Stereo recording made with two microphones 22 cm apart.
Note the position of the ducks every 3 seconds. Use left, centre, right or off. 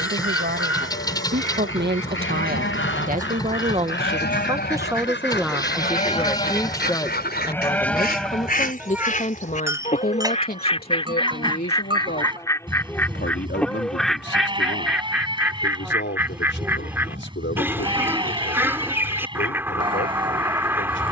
left, left, left, left, centre, centre, centre.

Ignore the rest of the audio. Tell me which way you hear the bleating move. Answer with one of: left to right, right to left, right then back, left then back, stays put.
left to right.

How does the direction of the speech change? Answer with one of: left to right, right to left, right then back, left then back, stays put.
right to left.